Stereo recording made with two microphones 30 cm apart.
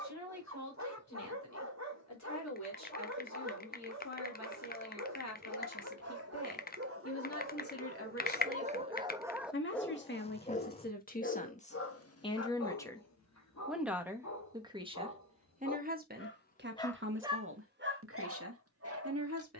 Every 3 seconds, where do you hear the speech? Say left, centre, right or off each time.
left, left, left, left, centre, right, right.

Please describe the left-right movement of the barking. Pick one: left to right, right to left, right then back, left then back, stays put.
left then back.